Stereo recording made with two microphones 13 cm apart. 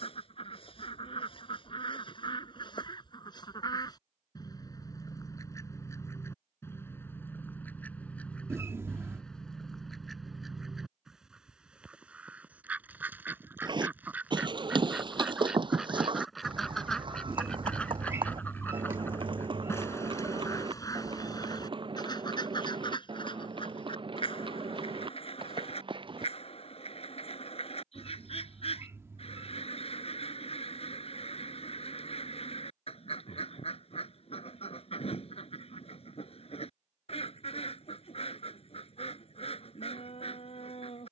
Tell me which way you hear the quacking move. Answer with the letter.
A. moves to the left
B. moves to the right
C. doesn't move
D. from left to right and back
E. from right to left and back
D.